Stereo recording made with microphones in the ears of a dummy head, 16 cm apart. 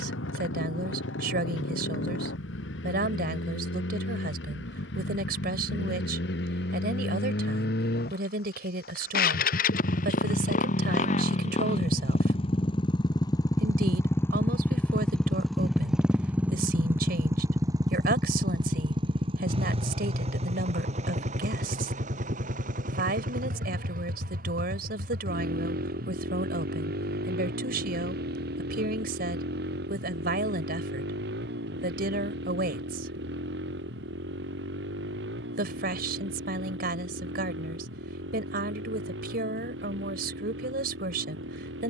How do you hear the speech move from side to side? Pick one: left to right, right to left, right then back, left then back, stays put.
stays put.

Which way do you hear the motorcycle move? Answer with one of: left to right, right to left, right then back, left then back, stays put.
left to right.